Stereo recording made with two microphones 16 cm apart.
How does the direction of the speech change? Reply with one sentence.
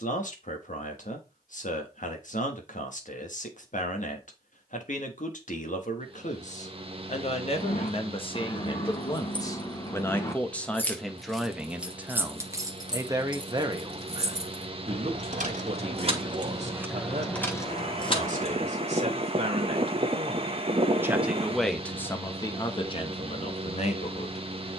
You can hear the speech move from left to right and back again.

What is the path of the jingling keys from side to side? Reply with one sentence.
In this clip you hear the jingling keys go right and come back.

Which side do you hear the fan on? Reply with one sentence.
You can hear the fan on the right.